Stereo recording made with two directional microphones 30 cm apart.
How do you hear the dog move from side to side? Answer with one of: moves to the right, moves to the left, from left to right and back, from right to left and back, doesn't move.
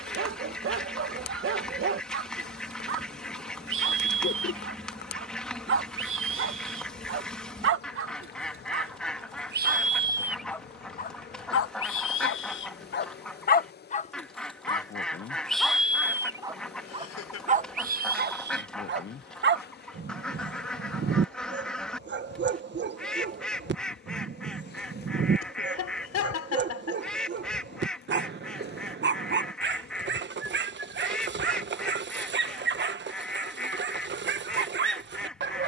from right to left and back.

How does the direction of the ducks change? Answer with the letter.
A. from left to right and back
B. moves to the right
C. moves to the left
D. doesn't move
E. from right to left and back
D.